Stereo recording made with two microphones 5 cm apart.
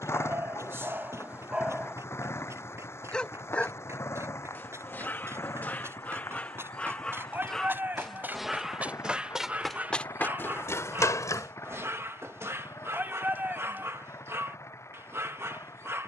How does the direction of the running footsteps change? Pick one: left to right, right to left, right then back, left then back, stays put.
right to left.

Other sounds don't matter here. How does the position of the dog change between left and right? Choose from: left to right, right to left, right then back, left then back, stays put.
left then back.